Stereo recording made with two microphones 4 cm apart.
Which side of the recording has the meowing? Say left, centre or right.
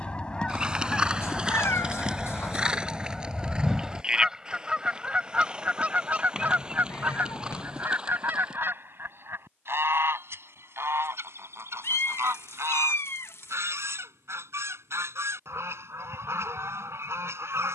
left.